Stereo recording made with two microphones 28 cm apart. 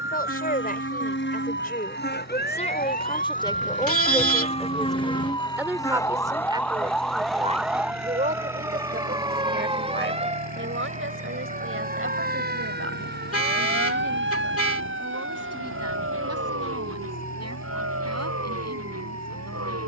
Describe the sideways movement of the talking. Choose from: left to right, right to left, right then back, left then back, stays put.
left to right.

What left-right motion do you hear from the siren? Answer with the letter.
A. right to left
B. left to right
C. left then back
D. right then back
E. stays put
B.